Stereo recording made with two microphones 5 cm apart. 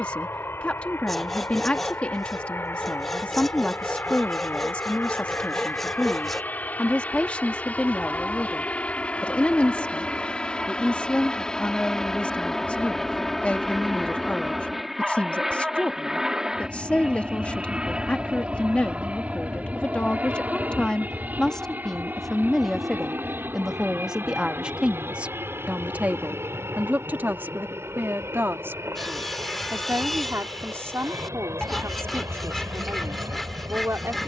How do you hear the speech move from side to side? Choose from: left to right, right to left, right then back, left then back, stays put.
left to right.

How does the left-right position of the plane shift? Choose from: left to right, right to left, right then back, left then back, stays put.
left to right.